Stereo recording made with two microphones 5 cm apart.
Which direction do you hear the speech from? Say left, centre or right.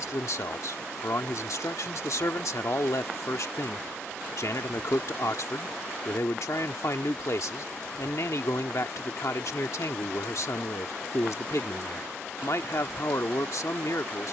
left.